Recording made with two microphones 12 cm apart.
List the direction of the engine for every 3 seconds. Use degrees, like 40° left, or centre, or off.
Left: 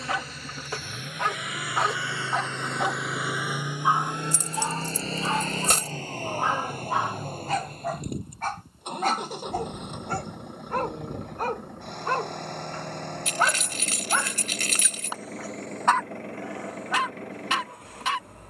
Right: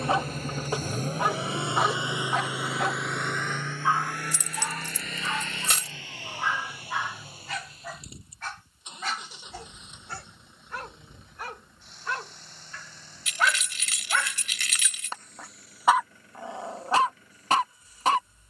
30° right, 20° left, 50° left, 60° left, 70° left, 70° left.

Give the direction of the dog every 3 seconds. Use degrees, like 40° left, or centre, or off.
10° right, 30° left, 40° left, 50° left, 40° left, 20° right.